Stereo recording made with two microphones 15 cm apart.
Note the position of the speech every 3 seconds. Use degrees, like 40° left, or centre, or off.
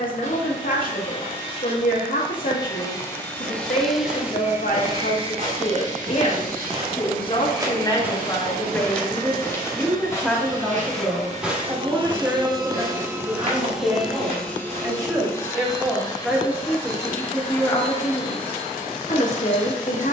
70° left, 60° left, 30° left, centre, 20° right, centre, 50° left.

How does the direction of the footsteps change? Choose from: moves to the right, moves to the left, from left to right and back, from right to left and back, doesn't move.
from right to left and back.